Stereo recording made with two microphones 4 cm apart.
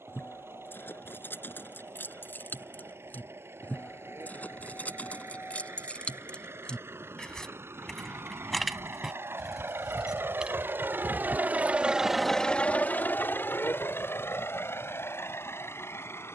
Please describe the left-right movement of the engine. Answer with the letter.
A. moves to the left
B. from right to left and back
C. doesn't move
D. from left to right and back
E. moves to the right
A.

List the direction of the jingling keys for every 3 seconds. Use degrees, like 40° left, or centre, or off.
60° left, 40° left, 10° left, 20° right, off, off.